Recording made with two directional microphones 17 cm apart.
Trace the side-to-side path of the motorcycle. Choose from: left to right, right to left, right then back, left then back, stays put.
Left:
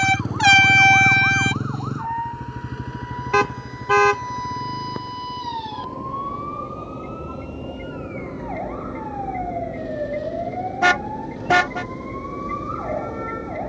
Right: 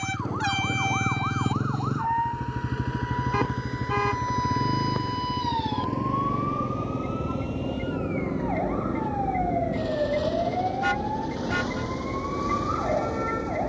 left to right.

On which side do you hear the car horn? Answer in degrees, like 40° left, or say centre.
70° left.